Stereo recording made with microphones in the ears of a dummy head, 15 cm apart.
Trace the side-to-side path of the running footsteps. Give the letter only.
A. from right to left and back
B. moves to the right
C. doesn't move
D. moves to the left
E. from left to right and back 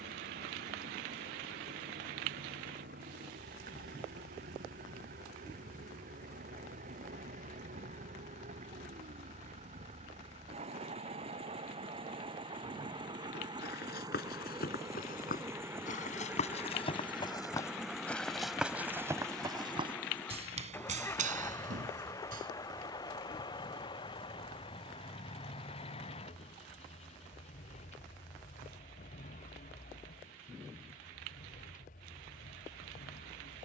B.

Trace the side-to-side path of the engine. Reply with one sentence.
In this clip you hear the engine move to the left.